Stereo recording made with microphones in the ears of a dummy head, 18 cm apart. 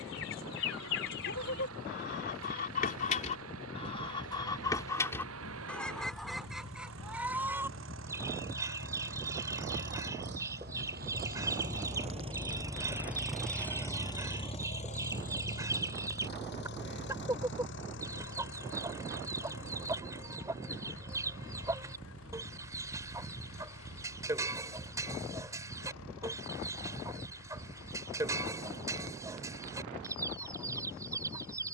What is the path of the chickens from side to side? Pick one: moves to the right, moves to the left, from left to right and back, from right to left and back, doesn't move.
moves to the right.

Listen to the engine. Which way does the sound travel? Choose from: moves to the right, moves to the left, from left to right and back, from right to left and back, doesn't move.
moves to the left.